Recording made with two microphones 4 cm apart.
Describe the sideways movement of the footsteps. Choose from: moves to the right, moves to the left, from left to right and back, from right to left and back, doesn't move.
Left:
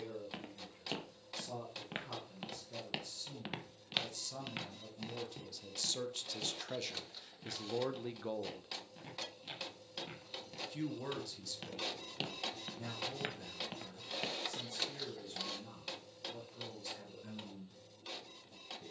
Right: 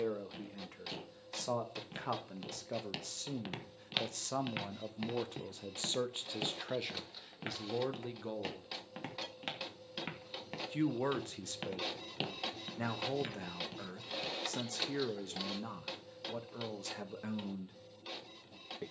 from left to right and back.